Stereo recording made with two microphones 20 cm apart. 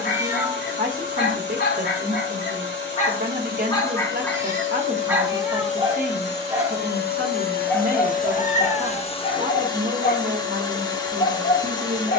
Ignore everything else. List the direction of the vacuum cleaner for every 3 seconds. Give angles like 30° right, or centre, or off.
60° left, 60° left, 50° left, 20° left.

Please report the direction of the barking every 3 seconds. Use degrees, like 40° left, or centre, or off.
50° left, centre, centre, 40° left.